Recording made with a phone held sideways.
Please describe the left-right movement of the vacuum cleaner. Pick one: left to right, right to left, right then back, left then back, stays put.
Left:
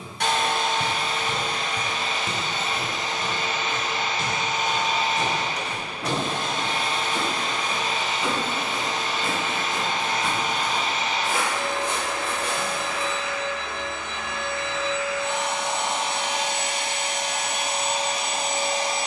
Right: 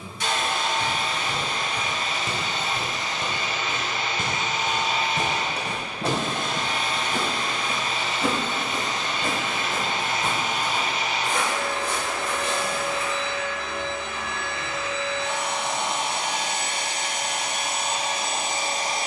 left to right.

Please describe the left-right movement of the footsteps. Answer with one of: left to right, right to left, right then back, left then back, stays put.
right then back.